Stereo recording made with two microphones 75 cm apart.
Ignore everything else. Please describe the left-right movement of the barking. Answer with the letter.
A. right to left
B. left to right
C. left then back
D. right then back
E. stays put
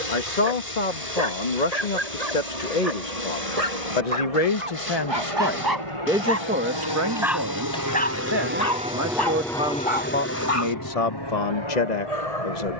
A.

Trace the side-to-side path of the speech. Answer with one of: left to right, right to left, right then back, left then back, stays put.
right then back.